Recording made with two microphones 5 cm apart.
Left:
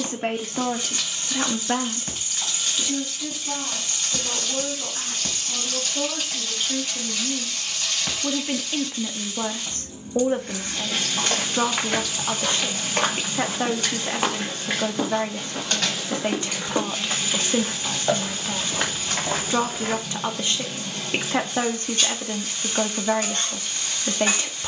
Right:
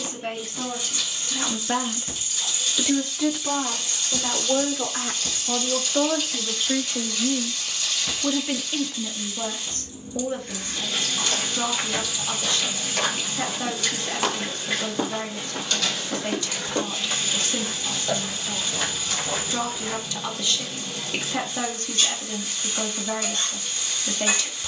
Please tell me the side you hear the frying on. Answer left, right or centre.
left.